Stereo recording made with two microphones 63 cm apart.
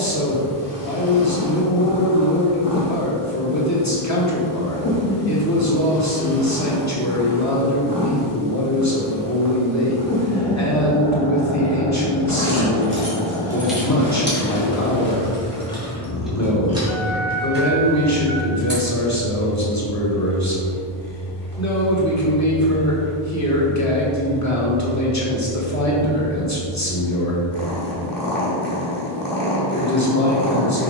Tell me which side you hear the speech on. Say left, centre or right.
left.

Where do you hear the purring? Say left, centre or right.
left.